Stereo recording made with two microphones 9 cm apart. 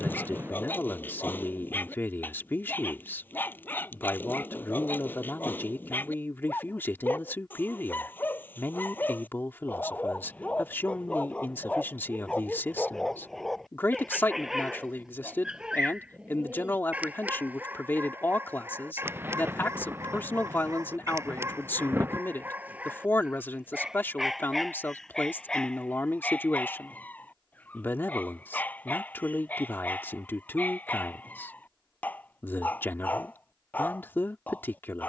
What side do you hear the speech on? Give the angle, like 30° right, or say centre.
20° left.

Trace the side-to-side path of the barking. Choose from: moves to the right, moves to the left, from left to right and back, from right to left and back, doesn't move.
from left to right and back.